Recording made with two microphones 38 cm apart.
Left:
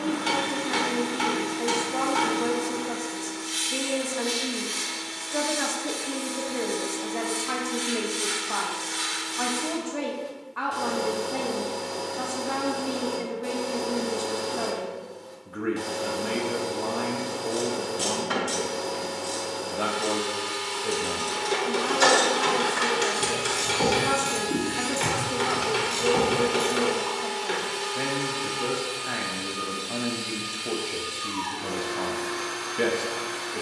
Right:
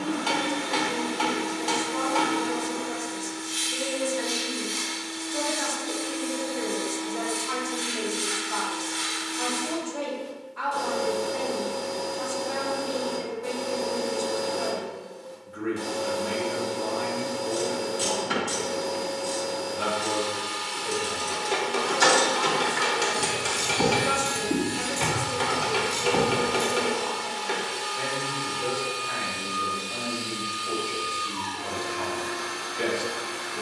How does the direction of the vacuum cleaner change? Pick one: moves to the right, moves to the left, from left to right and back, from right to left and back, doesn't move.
doesn't move.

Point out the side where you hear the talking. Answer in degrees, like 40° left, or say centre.
70° left.